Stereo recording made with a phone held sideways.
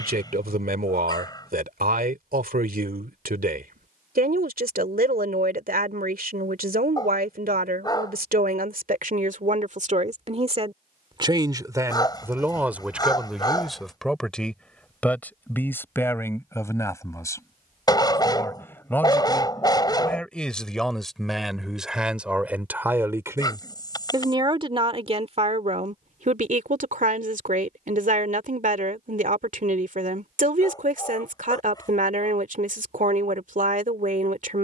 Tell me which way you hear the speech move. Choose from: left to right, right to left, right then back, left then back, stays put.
left then back.